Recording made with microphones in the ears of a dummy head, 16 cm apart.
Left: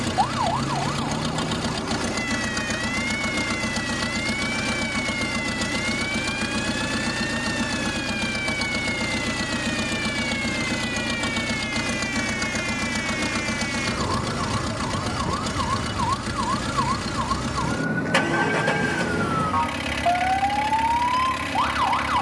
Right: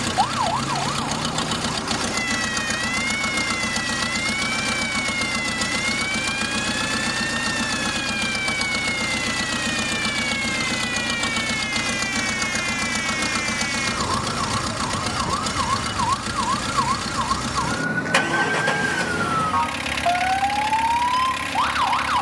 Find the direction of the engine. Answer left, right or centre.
right.